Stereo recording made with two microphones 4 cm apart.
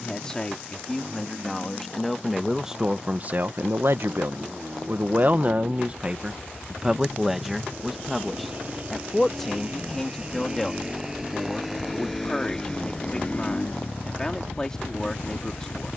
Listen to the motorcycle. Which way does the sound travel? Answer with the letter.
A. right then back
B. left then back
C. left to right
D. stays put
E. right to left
E.